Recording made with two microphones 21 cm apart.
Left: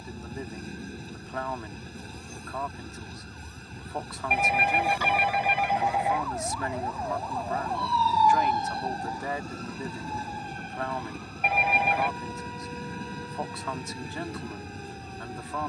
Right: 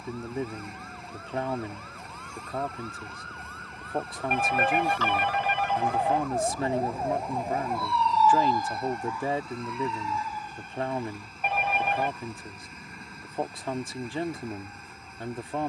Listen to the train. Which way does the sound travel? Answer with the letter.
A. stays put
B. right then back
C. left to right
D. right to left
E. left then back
A.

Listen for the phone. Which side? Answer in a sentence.
In this clip you hear the phone in the centre.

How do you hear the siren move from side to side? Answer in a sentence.
In this clip you hear the siren move to the left.